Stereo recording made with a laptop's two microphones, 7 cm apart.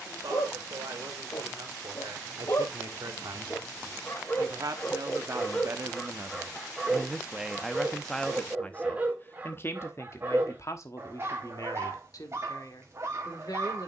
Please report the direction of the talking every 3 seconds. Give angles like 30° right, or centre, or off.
70° right, 50° right, centre, 50° left, 60° left.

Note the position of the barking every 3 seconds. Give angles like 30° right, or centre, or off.
50° left, 20° left, 10° right, 30° right, 40° right.